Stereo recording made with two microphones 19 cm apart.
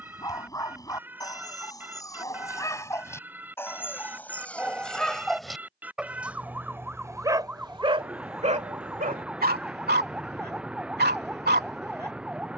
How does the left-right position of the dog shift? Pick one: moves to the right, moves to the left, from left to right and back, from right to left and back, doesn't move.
moves to the right.